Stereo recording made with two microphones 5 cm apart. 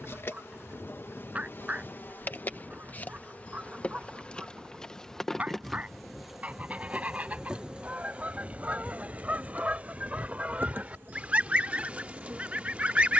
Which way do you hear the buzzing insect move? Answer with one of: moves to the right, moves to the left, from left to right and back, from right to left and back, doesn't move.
moves to the right.